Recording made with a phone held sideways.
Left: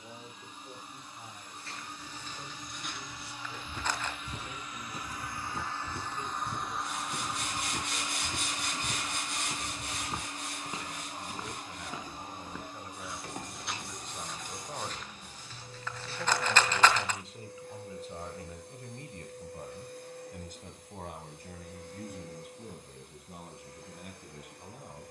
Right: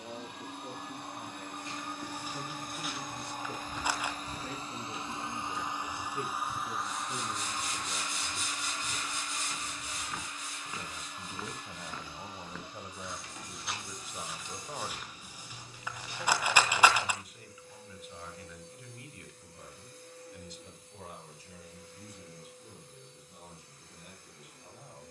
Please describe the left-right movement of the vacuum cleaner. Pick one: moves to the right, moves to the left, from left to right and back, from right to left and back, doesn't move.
moves to the left.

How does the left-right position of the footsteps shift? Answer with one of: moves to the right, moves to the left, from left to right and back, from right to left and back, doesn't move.
from right to left and back.